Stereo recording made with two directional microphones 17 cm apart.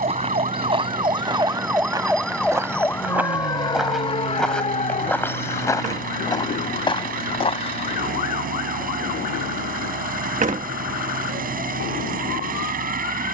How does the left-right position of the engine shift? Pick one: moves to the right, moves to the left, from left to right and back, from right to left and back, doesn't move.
doesn't move.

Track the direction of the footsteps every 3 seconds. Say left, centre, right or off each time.
right, centre, left, off, off.